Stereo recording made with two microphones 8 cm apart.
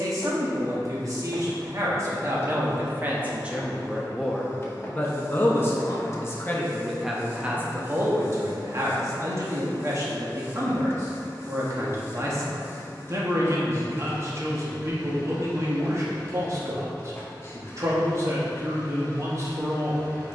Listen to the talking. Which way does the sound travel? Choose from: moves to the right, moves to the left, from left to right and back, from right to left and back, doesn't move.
from right to left and back.